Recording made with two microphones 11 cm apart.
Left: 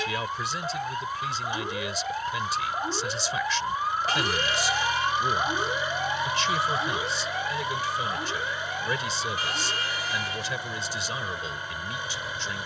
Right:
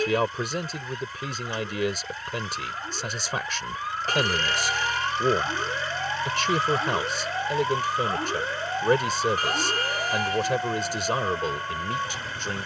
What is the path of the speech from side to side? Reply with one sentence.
In this clip you hear the speech stay in one place.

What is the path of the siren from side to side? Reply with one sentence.
In this clip you hear the siren move from left to right.